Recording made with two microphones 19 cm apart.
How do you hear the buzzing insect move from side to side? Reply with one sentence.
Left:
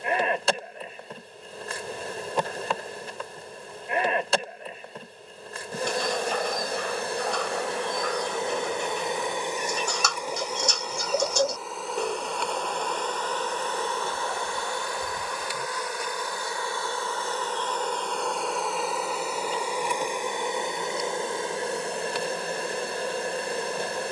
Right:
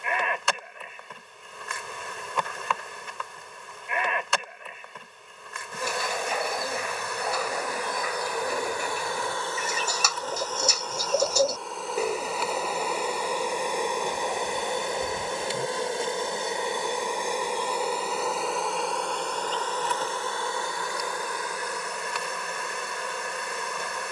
You can hear the buzzing insect go right and come back.